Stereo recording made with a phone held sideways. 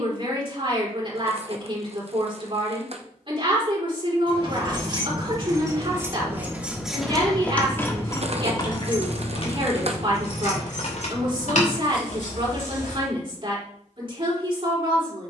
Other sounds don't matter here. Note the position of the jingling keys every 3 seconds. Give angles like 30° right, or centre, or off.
off, 30° right, 10° left, 60° left, 70° left.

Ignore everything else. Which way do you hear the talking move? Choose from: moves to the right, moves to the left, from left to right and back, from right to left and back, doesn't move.
doesn't move.